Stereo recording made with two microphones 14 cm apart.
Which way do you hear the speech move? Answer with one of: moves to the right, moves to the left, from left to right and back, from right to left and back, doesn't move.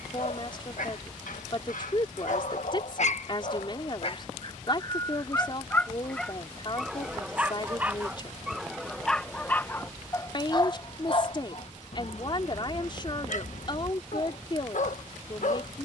doesn't move.